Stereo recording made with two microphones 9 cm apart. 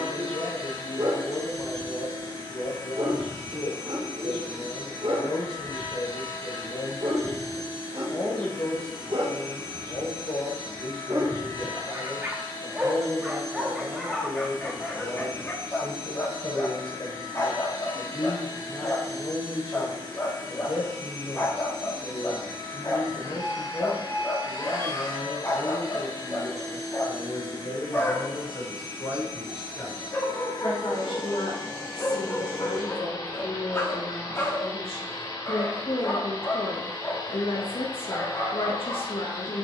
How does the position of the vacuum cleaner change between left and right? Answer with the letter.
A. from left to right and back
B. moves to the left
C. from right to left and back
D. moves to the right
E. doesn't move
E.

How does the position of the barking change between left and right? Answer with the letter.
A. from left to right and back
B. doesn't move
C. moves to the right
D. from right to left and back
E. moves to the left
E.